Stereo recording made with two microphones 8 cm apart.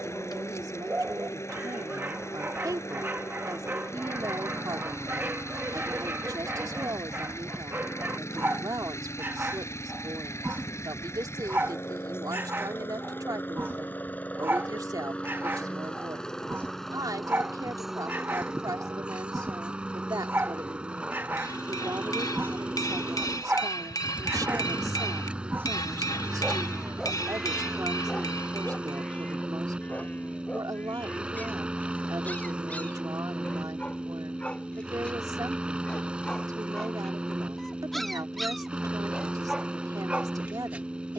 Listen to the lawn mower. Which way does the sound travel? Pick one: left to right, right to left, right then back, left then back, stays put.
left to right.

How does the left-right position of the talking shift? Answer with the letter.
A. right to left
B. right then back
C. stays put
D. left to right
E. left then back
C.